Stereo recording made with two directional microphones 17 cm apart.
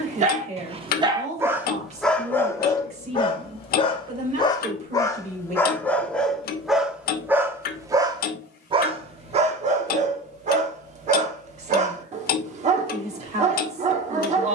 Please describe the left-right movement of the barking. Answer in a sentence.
You can hear the barking go left and come back.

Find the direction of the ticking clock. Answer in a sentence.
You can hear the ticking clock on the left.